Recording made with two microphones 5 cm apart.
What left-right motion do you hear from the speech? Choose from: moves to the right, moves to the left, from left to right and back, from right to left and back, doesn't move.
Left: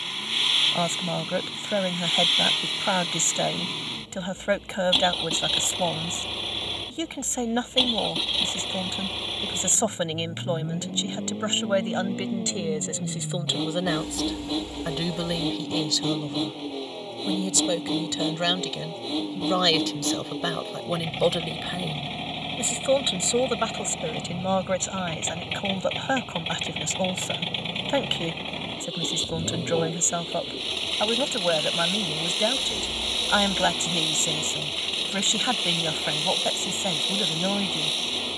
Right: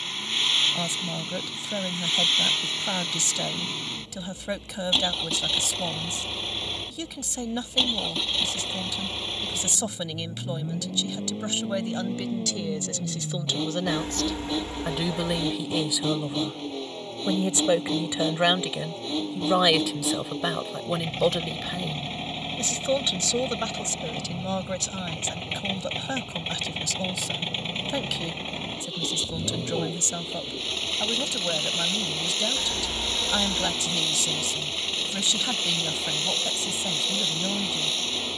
from left to right and back.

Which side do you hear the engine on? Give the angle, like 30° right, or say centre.
centre.